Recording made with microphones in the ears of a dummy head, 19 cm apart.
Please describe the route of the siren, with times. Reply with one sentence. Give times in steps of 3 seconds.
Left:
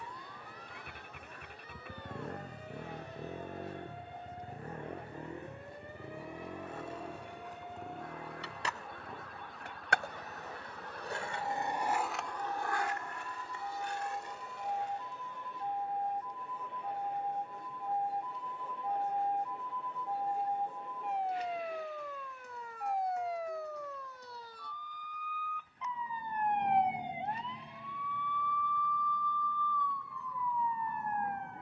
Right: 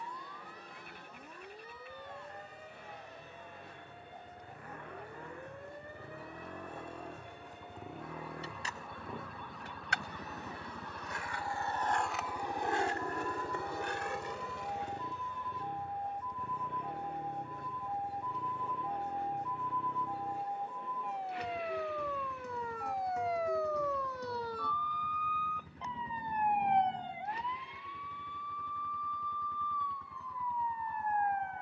In this clip you hear the siren on the right from 0 s and on the left from 27 s.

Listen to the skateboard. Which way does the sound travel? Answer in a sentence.
You can hear the skateboard move from left to right.